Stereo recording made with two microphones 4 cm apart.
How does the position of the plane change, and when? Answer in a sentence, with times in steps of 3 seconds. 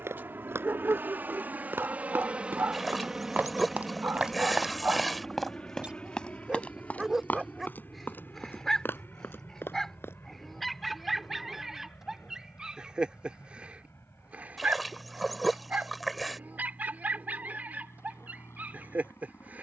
You can hear the plane on the right from 0 s, in the centre from 3 s and on the left from 6 s.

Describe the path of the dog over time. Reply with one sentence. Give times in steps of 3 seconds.
You can hear the dog on the right from 0 s, in the centre from 6 s and on the right from 12 s.